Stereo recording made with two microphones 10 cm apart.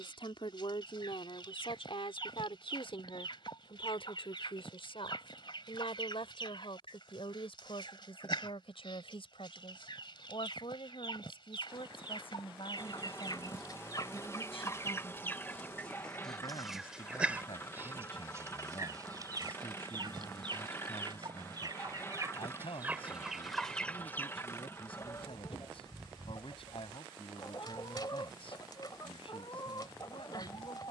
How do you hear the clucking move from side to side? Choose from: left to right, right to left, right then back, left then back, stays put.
right then back.